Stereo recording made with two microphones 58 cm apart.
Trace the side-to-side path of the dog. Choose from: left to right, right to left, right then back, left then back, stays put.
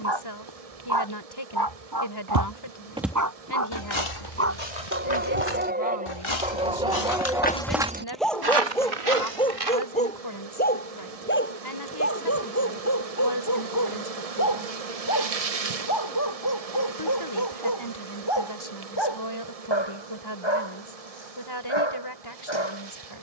right to left.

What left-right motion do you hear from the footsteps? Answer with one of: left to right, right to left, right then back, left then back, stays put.
left then back.